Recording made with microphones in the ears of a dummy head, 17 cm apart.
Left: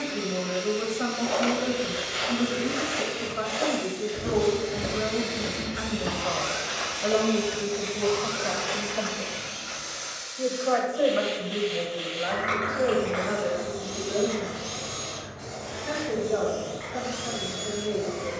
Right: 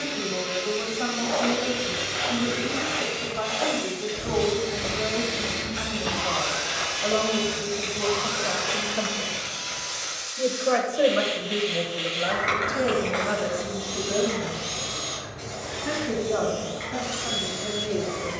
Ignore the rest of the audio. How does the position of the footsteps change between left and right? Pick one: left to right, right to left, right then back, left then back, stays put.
left to right.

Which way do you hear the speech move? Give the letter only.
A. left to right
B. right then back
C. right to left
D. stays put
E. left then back
A.